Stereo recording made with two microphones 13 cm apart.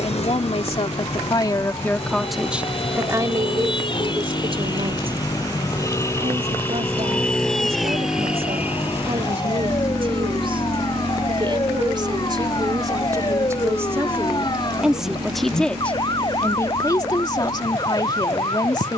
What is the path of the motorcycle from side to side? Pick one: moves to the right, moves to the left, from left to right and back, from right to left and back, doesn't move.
moves to the right.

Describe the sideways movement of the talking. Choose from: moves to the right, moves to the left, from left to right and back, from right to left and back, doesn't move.
from left to right and back.